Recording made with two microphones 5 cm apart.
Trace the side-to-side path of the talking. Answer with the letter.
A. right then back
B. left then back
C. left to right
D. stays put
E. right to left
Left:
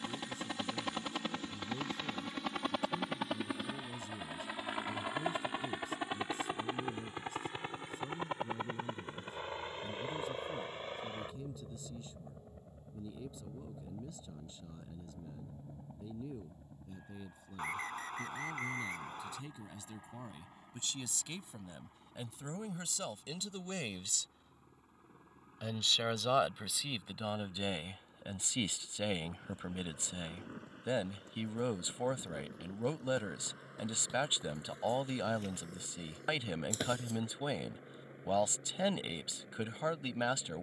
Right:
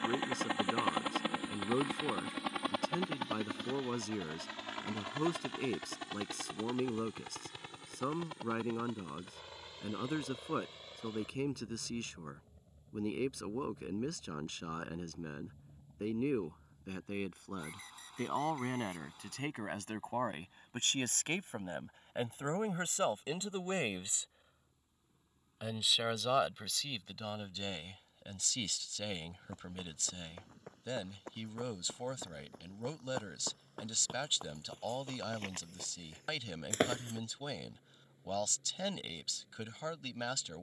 E.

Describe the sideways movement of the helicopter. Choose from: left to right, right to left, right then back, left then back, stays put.
right to left.